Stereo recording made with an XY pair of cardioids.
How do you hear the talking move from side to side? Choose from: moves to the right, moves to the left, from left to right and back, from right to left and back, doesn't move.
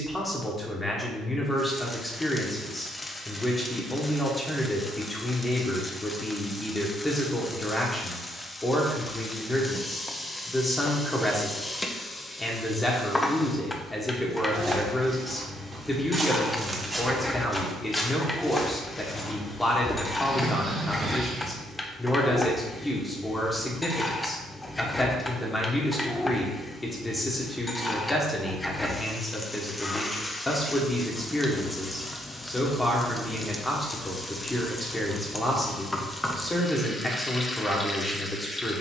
doesn't move.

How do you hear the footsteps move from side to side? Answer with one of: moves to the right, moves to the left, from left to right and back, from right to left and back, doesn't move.
from right to left and back.